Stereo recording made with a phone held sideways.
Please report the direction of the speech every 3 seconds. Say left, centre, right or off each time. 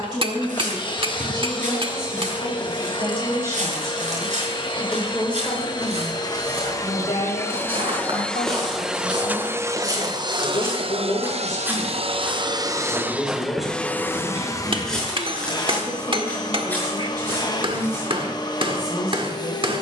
right, centre, left, left, centre, right, right.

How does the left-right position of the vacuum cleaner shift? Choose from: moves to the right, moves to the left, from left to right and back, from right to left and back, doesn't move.
from left to right and back.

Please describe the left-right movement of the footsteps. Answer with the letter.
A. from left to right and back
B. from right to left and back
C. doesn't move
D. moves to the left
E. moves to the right
D.